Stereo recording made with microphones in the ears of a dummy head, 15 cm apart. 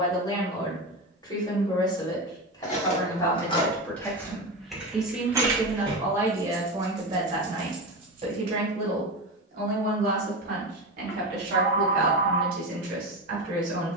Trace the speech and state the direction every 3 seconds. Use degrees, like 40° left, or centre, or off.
20° left, centre, 30° right, 50° right, 60° right.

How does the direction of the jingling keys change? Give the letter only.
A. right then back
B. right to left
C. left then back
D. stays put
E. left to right
E.